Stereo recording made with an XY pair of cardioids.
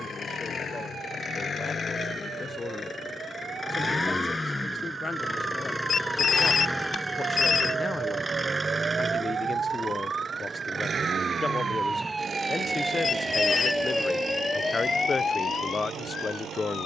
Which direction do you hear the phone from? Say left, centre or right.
left.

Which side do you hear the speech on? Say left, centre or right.
left.